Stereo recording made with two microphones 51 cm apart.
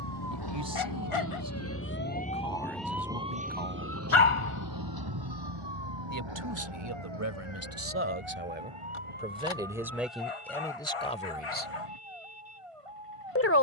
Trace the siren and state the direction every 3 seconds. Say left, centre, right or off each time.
left, right, right, right, right.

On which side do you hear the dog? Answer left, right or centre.
left.